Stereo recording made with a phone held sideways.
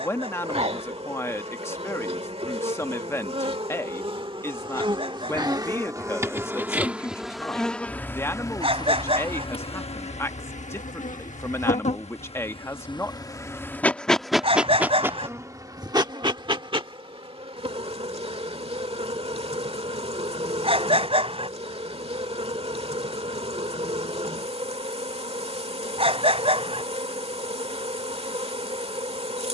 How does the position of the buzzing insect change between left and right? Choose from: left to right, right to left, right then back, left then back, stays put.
left then back.